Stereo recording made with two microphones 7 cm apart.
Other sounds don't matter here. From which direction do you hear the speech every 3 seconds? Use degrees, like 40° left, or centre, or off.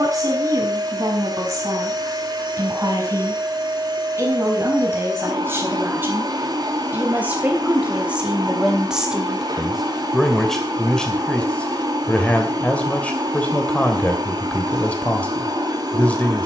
50° right, 40° right, 20° right, 10° left, 20° left, 20° left.